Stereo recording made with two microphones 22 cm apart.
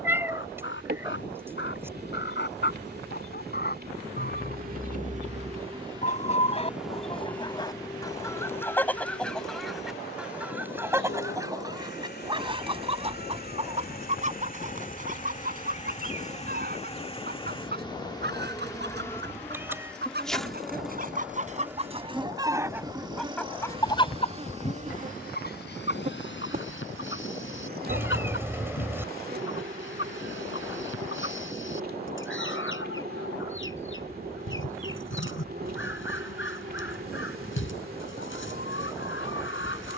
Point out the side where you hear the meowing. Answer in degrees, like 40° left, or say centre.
10° right.